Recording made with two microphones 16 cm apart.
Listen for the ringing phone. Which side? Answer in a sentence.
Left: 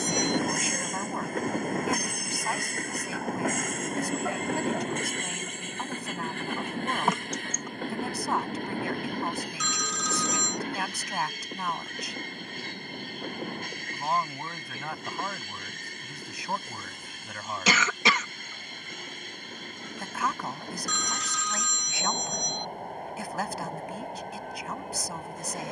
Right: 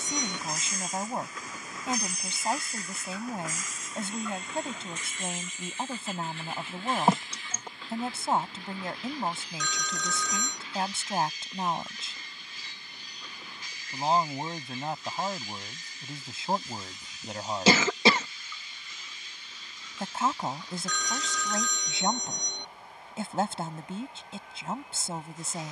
In this clip you hear the ringing phone on the right.